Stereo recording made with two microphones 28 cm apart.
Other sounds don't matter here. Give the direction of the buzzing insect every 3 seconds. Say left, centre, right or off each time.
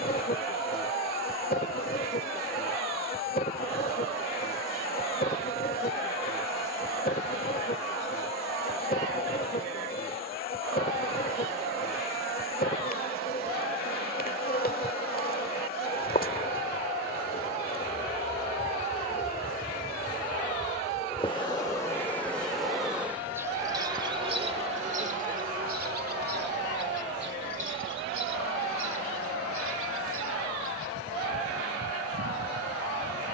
left, left, left, left, left, left, left, centre, right, right, right.